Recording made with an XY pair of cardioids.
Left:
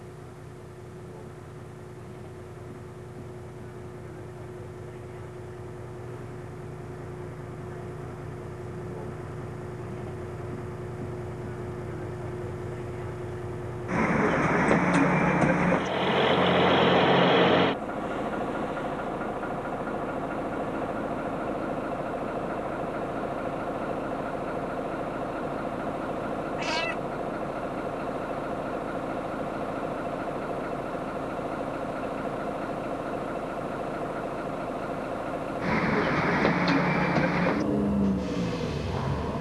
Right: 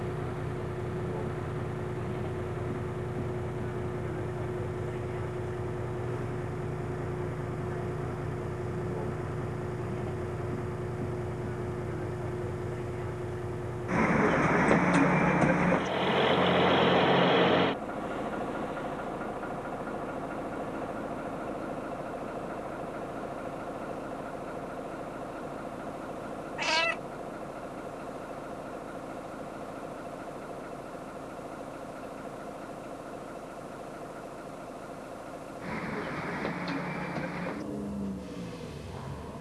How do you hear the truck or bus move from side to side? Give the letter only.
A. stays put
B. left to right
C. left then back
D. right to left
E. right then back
D.